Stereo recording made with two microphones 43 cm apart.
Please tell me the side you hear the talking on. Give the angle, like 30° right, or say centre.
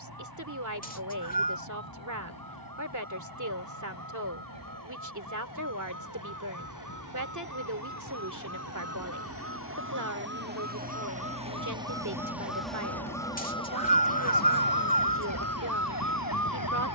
40° right.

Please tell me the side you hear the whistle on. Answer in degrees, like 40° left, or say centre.
20° left.